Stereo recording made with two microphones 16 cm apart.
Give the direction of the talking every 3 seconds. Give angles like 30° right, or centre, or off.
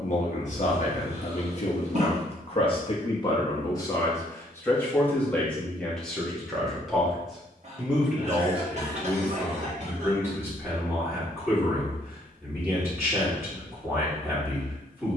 40° left, 20° left, centre, 10° right, 10° right.